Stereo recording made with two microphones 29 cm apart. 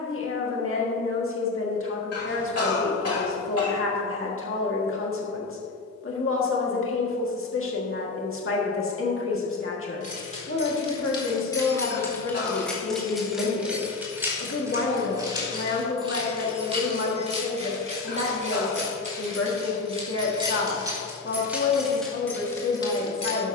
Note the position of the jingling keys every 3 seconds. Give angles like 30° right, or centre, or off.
off, off, off, 20° left, centre, 20° right, 20° right, centre.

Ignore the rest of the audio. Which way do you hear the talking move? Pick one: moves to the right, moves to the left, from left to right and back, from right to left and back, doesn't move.
doesn't move.